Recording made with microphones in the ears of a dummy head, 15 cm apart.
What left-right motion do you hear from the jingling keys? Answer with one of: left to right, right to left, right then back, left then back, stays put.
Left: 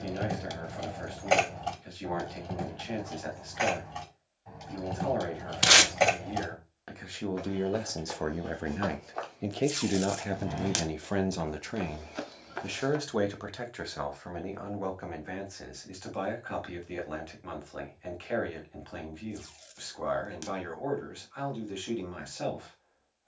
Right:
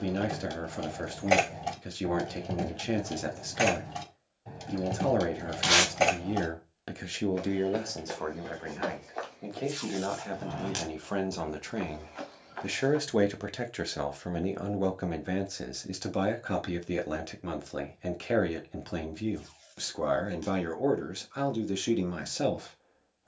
right then back.